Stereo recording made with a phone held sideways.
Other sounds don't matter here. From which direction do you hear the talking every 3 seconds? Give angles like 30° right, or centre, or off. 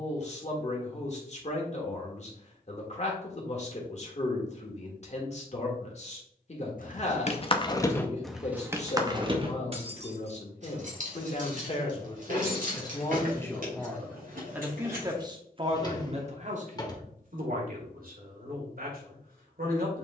40° left, 40° left, 40° left, 40° left, 10° left, 50° right, 70° right.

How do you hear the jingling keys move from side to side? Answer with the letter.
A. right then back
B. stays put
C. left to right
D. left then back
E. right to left
C.